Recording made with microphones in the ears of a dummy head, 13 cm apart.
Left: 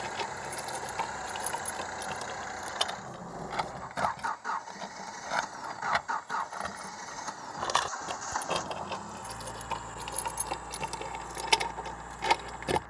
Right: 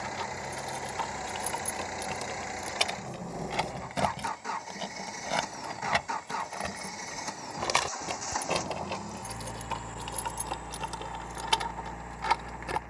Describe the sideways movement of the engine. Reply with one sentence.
In this clip you hear the engine stay put.